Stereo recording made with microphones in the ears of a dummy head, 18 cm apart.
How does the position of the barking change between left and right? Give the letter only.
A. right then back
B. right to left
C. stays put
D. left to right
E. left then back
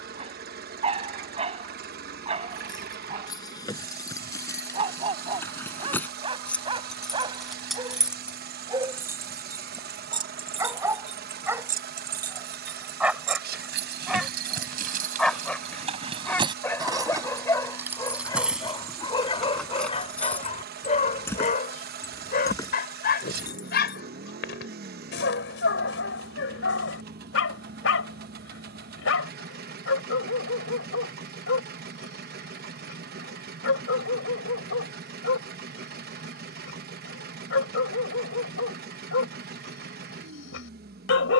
B.